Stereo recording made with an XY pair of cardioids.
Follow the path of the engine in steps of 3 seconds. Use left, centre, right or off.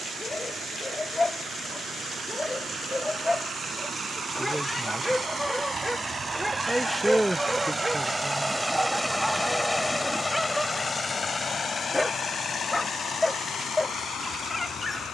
right, right, right, left, left.